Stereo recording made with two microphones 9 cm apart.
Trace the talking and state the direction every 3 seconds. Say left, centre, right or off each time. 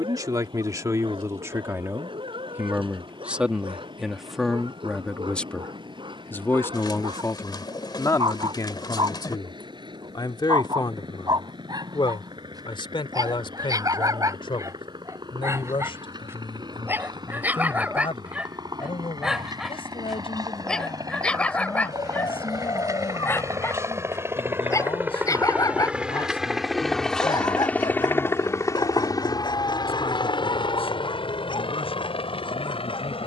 right, centre, left, left, left, left, left, left, left, left, left.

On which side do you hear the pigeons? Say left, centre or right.
left.